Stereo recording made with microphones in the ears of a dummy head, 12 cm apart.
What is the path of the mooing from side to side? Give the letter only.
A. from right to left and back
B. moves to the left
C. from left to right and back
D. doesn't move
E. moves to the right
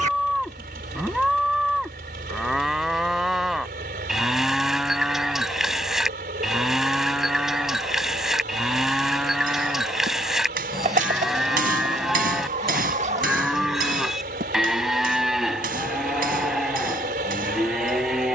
D.